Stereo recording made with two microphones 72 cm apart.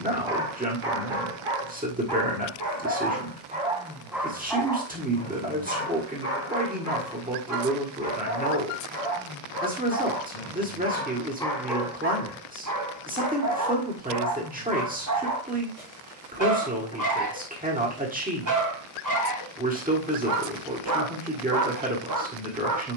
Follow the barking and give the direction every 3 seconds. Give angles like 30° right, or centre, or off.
40° right, centre, 30° left, 20° left, 20° right, 30° right, 30° right, 30° right.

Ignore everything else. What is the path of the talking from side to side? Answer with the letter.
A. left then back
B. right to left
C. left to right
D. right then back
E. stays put
E.